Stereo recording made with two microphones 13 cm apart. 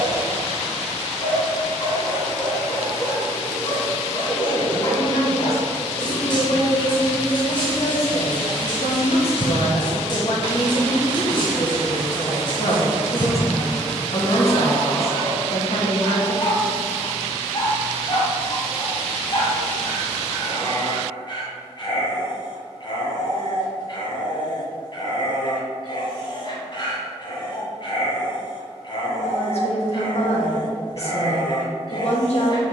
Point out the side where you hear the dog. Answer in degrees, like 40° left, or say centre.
40° left.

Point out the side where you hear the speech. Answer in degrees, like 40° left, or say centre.
60° left.